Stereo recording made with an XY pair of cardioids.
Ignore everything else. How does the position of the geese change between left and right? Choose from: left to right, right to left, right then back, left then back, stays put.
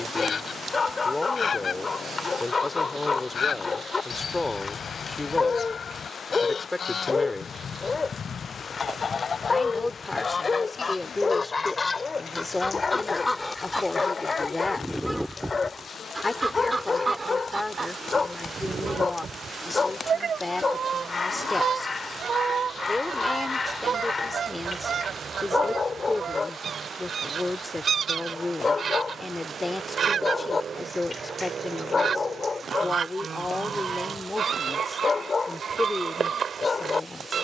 left to right.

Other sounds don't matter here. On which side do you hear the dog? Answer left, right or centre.
left.